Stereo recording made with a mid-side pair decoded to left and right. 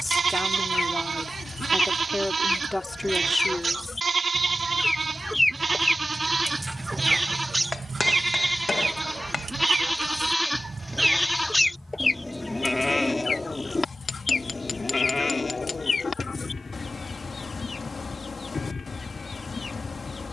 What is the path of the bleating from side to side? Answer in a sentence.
You can hear the bleating move from right to left.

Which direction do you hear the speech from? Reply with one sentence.
You can hear the speech in the centre.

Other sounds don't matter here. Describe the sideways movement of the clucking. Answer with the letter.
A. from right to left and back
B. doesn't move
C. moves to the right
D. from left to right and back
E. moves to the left
D.